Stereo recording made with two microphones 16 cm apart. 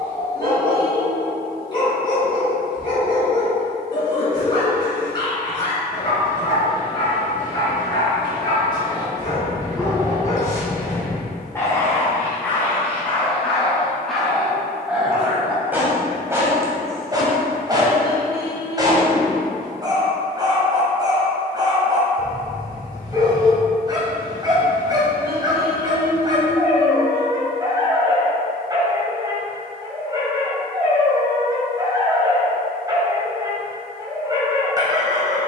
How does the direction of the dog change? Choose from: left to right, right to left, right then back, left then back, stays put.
left to right.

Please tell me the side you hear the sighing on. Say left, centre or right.
right.